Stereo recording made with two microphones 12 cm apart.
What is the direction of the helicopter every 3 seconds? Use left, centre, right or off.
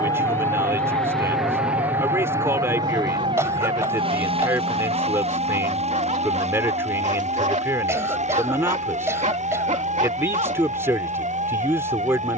centre, right, right, right.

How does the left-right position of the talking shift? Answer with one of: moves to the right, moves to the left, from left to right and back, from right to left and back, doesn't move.
doesn't move.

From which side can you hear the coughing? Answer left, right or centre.
right.